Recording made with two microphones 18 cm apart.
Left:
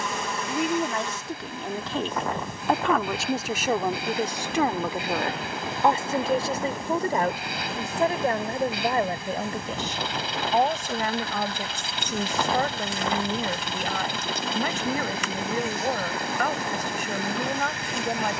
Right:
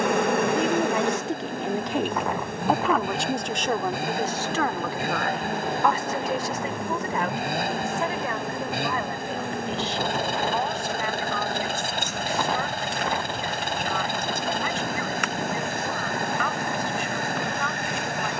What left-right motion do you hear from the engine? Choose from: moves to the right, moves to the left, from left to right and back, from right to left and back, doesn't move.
doesn't move.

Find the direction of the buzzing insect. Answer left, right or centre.
right.